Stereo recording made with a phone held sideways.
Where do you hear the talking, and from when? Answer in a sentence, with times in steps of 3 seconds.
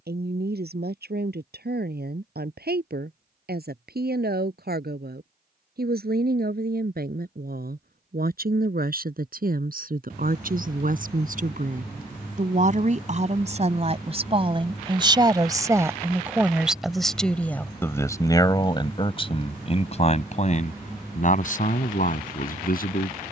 In this clip you hear the talking on the right from 0 s, in the centre from 15 s and on the left from 18 s.